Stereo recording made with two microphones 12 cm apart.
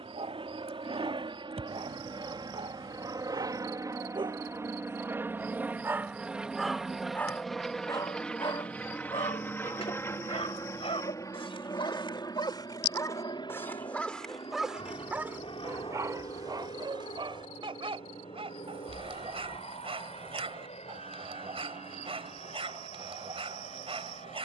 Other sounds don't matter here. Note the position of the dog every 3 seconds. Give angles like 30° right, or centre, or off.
60° right, 40° right, 20° left, 50° left, 20° left, 30° right, 50° right, 50° right.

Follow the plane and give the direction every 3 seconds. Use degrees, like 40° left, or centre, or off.
40° right, 20° right, centre, 20° left, 40° left, 50° left, 50° left, 60° left.